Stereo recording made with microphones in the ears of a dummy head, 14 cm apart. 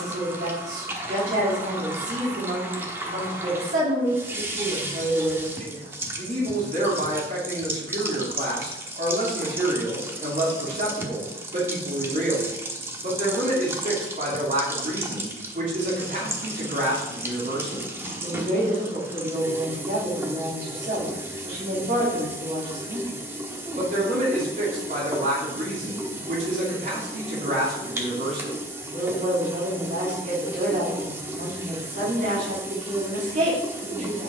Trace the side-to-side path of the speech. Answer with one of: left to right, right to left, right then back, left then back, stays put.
stays put.